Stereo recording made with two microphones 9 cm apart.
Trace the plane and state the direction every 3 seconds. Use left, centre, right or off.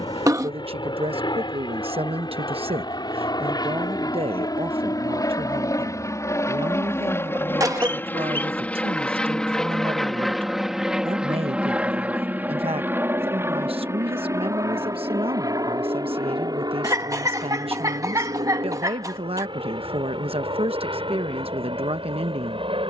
left, left, left, centre, right, right, right, right.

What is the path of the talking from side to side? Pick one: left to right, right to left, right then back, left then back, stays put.
stays put.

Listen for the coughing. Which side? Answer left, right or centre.
right.